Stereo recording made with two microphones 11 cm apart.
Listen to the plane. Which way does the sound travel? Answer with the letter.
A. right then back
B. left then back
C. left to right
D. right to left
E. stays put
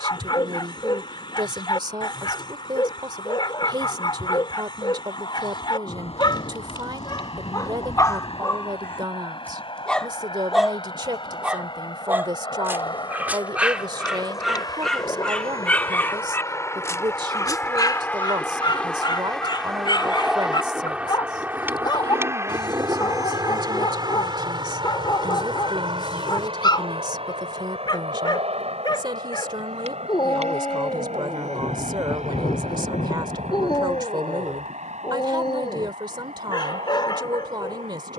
C.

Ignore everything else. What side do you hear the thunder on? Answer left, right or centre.
left.